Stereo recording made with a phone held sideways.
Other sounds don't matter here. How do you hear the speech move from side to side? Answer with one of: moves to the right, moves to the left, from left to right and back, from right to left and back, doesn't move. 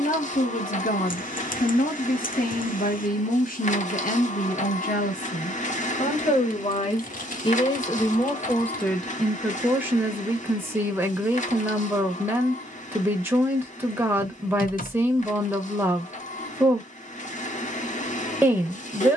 moves to the right.